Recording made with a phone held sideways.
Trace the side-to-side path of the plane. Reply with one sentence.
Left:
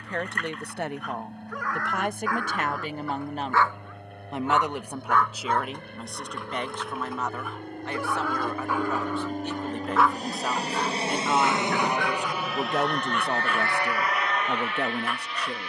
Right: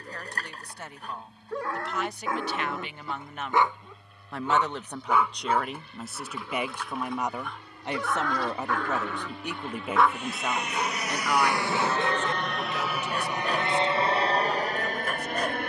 You can hear the plane move from left to right.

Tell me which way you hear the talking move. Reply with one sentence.
You can hear the talking move from left to right and back again.